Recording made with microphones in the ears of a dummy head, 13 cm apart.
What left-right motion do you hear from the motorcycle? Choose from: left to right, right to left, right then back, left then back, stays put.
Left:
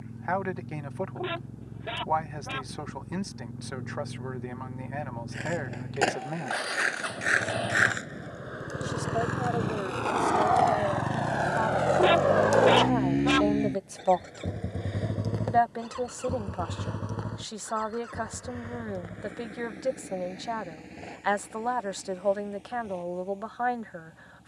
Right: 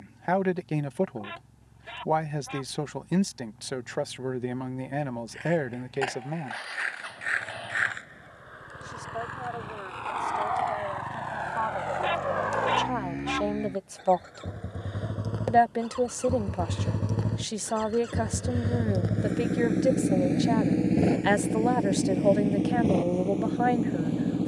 left to right.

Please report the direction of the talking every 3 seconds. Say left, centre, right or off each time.
right, right, centre, left, centre, right, right, right.